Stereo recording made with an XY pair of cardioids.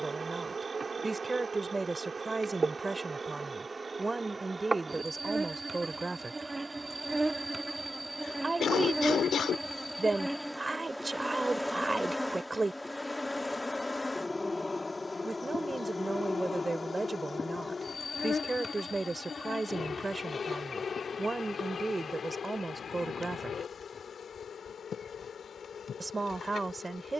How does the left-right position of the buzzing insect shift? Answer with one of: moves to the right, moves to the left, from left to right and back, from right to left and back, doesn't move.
moves to the left.